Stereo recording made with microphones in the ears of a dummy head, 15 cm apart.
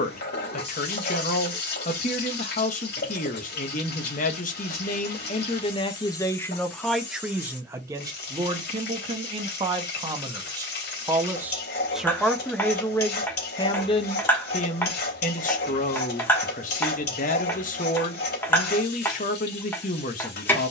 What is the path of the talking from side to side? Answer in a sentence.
You can hear the talking move from left to right and back again.